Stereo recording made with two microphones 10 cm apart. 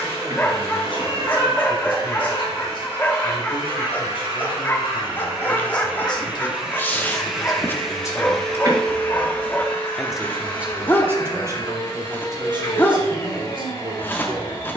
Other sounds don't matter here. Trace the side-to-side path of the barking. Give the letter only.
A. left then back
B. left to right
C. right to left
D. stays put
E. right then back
D.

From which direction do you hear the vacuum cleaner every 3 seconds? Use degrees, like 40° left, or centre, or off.
40° right, 30° right, centre, 30° left, 40° left.